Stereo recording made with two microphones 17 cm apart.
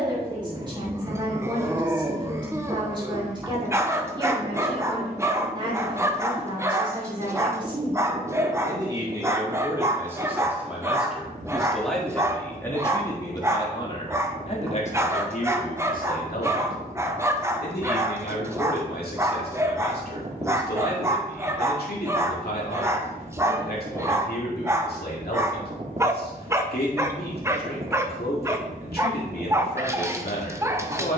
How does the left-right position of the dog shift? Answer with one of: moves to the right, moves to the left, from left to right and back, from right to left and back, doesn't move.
doesn't move.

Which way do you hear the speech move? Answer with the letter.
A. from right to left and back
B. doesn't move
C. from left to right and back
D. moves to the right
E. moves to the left
E.